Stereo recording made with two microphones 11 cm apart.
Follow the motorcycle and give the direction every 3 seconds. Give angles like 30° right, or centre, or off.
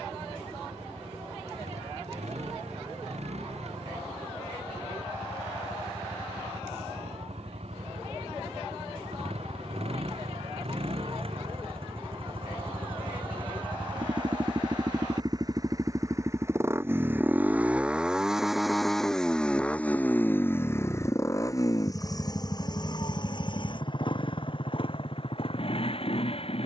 80° right, 70° right, 70° right, 60° right, 50° right, 20° right, 10° left, 30° left, 50° left.